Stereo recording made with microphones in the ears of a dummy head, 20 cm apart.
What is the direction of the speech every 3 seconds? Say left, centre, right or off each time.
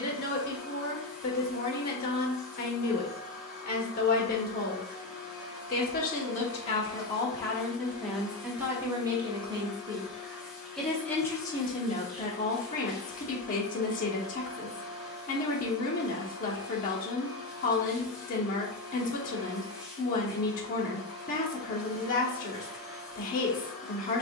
left, left, centre, centre, left, left, left, left.